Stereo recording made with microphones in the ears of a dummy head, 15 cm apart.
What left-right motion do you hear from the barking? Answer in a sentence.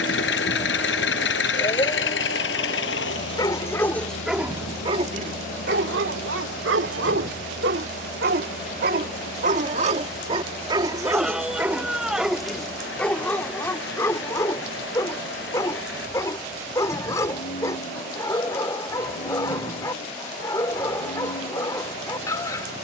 You can hear the barking move from left to right and back again.